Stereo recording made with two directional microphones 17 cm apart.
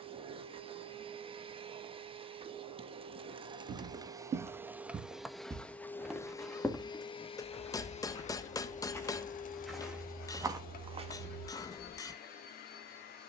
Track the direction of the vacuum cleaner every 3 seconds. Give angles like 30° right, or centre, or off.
30° right, 10° right, 30° left, 60° left, 70° left.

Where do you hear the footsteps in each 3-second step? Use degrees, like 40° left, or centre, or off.
off, 40° right, 20° left, 10° right, off.